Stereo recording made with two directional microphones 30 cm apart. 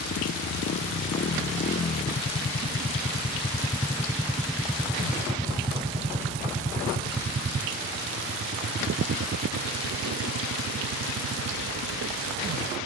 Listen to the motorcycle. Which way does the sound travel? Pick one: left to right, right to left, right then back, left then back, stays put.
left to right.